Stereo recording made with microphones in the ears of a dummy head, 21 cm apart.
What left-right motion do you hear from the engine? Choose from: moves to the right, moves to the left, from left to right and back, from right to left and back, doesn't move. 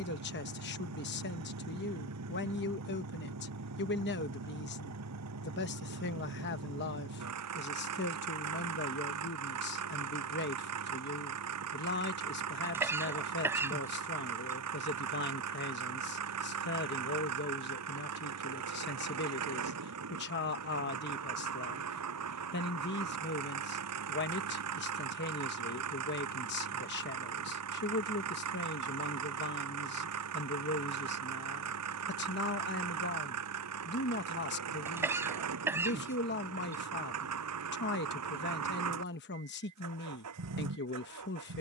doesn't move.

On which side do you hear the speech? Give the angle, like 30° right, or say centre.
50° left.